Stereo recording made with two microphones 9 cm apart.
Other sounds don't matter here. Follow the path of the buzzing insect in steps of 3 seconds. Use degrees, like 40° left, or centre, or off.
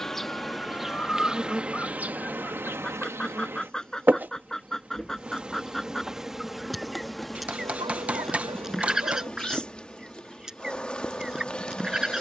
10° right, 20° right, centre, 10° left.